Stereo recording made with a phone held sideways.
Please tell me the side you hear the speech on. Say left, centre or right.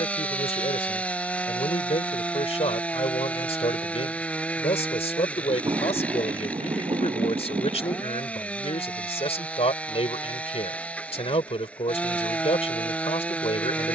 left.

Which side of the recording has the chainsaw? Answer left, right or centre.
centre.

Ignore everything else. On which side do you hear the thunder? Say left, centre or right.
right.